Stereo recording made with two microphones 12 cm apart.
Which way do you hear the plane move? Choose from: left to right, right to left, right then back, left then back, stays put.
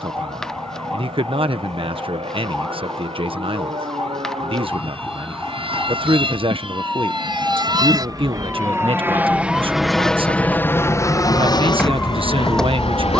right to left.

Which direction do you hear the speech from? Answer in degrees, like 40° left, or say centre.
50° right.